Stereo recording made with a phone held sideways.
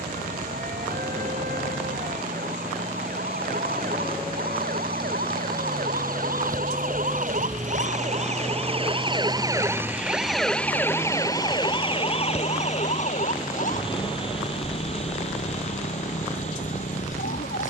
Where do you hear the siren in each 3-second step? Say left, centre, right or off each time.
right, right, right, centre, left, left.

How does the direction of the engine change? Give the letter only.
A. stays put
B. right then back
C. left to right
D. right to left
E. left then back
D.